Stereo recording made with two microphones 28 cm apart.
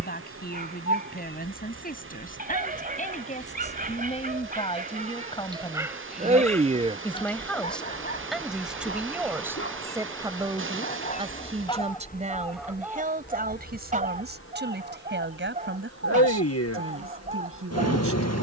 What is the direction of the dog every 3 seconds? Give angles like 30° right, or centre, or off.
30° right, 30° right, 20° left, 30° left, 20° right, 30° right.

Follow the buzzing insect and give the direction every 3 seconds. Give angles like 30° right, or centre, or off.
50° right, 40° right, 10° right, 10° left, 40° left, 60° left.